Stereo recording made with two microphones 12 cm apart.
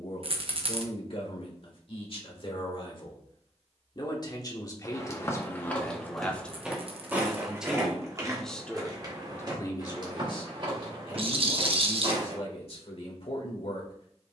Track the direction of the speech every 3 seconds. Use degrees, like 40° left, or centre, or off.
50° left, 30° left, centre, 40° left, 60° left.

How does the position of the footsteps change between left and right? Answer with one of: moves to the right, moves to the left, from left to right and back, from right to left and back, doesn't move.
moves to the right.